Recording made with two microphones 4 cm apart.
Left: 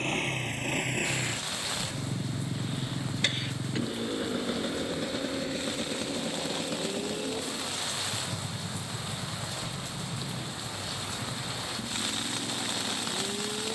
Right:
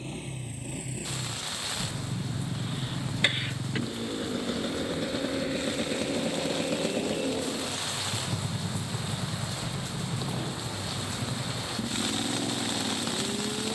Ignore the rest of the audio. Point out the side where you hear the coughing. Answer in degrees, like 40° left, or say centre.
20° right.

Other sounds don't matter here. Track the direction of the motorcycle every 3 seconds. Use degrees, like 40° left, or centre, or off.
60° left, 10° left, 40° right, 50° right, 60° right.